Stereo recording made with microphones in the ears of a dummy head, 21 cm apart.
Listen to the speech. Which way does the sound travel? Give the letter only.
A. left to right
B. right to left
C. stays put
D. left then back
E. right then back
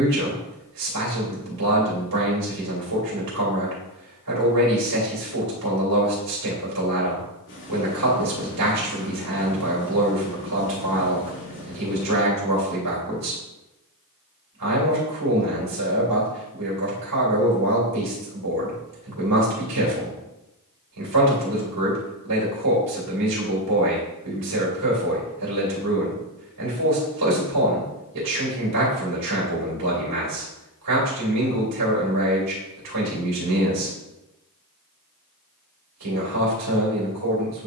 C.